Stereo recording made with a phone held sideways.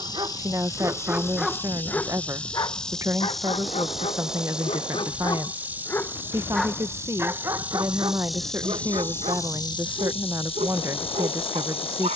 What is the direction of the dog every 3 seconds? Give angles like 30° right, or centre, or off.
centre, 40° left, 20° right, 50° right.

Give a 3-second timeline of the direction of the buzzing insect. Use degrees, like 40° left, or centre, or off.
10° left, centre, 10° right, 30° left.